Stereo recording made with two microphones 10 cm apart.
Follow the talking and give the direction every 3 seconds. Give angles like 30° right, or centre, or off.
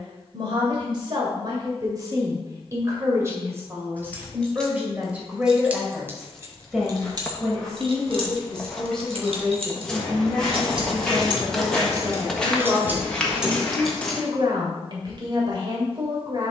40° right, 20° right, centre, 10° right, 30° right, 50° right.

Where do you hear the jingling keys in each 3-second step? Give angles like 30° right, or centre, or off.
off, centre, 50° right, 50° right, 10° right, off.